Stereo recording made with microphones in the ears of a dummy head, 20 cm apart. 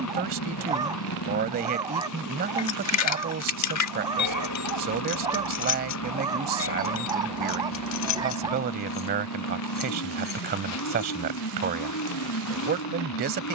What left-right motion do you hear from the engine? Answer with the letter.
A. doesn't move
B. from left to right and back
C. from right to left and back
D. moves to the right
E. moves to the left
A.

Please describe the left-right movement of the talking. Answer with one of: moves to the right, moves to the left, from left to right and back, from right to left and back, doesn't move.
doesn't move.